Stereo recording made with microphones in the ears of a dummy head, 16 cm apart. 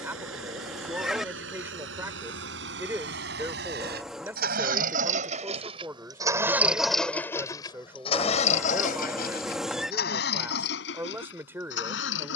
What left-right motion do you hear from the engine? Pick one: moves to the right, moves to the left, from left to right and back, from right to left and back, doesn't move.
moves to the left.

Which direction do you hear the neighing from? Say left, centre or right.
centre.